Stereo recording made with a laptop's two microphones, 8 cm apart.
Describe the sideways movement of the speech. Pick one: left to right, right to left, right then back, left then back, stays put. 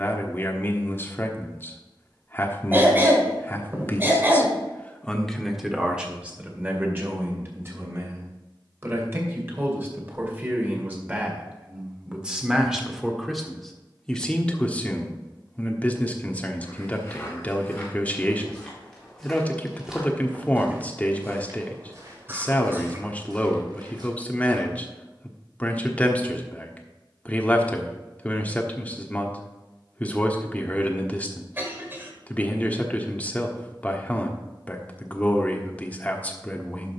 right then back.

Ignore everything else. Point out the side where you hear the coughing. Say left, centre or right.
right.